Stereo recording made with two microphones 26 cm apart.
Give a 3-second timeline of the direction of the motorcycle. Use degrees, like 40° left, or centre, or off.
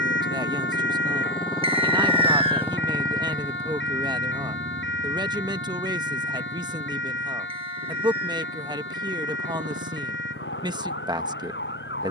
20° left, 30° right, 50° right, 60° right.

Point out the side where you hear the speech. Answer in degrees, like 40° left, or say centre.
20° right.